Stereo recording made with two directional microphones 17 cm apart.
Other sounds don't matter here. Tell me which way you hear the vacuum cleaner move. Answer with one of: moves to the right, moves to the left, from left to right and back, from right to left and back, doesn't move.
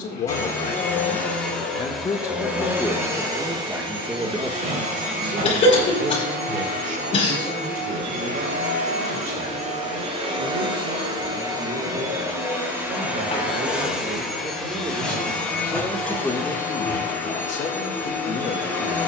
from left to right and back.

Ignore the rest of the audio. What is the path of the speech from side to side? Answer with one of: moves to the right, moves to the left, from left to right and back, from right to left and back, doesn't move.
from left to right and back.